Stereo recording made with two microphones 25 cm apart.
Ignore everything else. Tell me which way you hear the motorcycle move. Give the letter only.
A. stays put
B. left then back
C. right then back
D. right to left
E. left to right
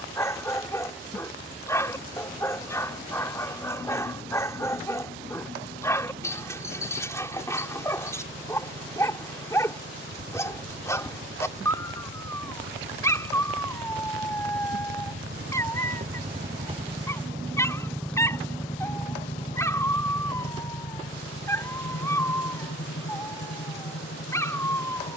D.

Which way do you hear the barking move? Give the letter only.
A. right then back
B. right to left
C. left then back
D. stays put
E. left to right
D.